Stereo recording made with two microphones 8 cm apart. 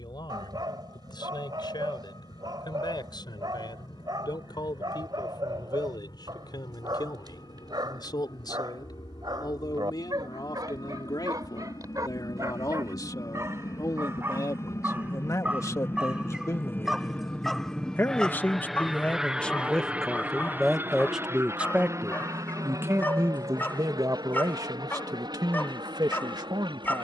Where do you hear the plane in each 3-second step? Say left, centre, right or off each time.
left, left, left, left, left, left, centre, right, right.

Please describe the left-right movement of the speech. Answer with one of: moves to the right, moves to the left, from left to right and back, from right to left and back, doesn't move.
moves to the right.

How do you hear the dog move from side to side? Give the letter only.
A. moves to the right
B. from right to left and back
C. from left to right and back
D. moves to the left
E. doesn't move
D.